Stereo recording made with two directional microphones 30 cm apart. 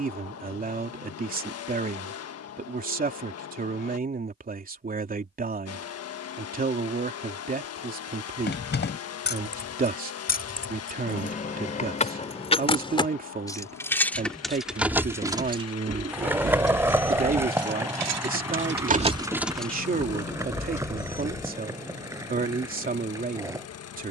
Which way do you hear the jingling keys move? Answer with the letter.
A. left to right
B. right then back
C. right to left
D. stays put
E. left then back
B.